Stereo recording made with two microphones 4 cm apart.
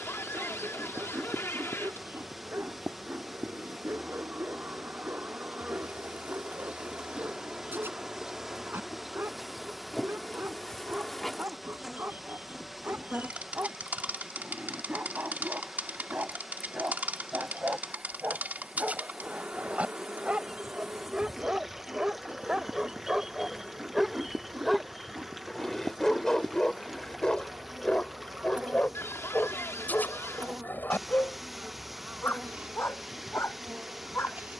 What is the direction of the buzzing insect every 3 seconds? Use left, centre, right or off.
right, right, right, centre, right, right, right, right, right, right, right, right.